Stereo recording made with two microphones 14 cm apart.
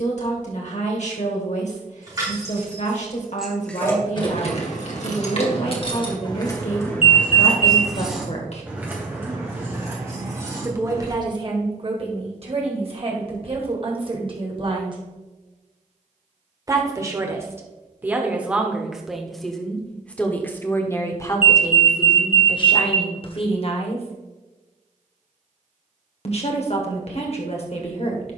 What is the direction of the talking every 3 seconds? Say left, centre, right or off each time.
left, left, left, right, right, right, centre, left, left, left.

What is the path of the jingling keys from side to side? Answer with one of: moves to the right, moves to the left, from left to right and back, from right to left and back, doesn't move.
from right to left and back.